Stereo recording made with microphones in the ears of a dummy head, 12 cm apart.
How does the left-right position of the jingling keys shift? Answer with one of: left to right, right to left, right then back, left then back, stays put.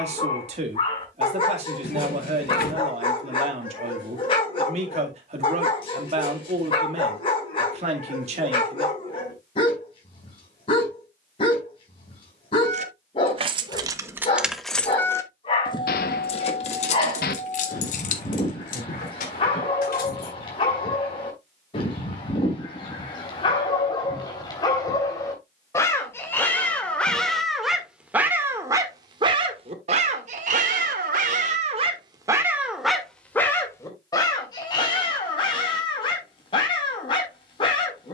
right to left.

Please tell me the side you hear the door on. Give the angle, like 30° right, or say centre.
70° left.